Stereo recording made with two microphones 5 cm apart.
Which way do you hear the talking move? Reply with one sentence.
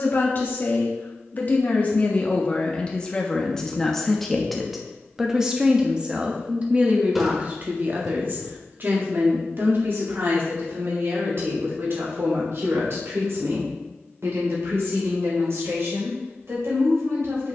You can hear the talking travel towards the right.